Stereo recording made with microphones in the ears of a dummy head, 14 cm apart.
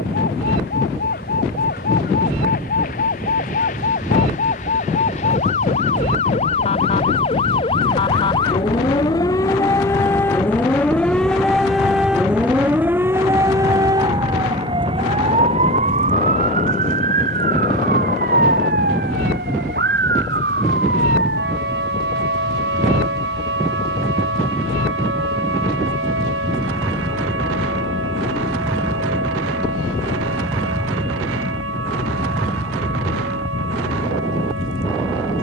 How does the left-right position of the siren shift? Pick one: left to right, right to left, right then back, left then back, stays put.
left to right.